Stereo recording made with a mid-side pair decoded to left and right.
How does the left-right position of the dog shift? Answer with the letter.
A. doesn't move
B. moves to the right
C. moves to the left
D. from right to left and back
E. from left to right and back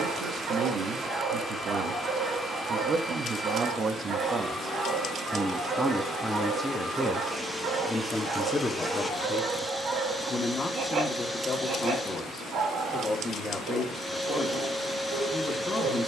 A.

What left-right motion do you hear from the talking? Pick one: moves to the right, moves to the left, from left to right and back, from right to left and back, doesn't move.
moves to the left.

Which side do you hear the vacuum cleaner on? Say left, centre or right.
centre.